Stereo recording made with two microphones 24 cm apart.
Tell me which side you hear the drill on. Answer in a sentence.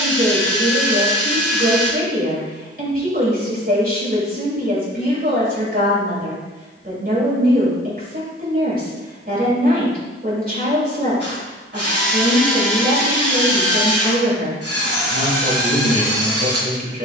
You can hear the drill on the right.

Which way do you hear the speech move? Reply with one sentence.
In this clip you hear the speech stay put.